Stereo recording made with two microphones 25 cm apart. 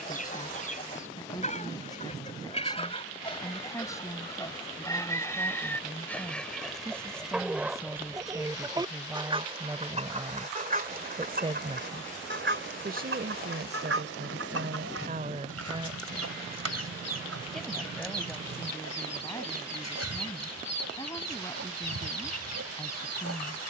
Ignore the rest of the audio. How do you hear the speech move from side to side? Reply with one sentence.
You can hear the speech move from left to right and back again.